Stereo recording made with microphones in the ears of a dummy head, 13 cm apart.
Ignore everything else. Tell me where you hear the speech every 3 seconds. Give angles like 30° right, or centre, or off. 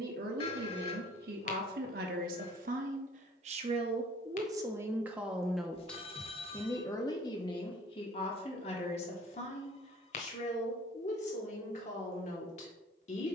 70° right, 20° right, 30° left, 40° left, 50° left.